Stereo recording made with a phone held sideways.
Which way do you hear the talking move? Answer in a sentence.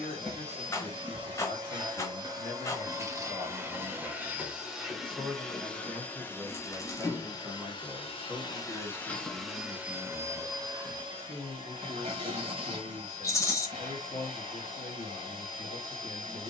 In this clip you hear the talking move from left to right and back again.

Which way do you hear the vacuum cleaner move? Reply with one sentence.
You can hear the vacuum cleaner move from right to left and back again.